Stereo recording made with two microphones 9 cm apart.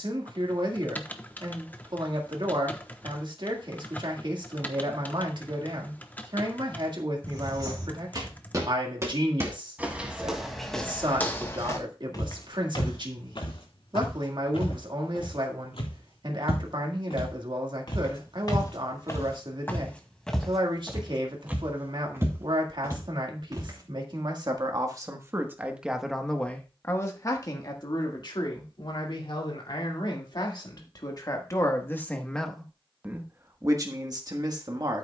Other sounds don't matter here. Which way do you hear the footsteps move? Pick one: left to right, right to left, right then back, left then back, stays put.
left then back.